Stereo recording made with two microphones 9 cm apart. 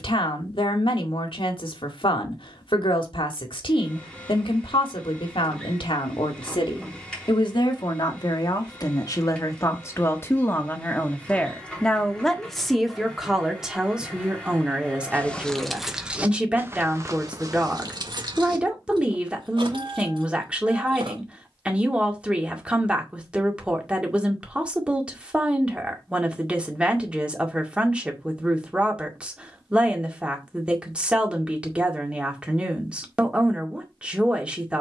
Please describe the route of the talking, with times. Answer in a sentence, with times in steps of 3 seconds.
In this clip you hear the talking on the left from 0 s and in the centre from 12 s.